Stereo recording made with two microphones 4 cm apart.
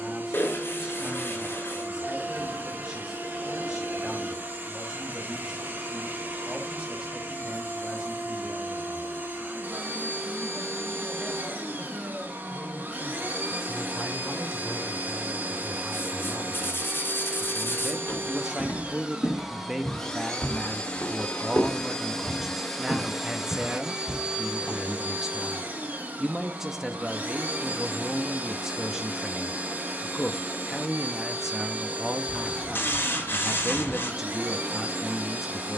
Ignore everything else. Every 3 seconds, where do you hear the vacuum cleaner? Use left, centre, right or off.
right, right, right, right, right, right, centre, centre, right, right, right, right.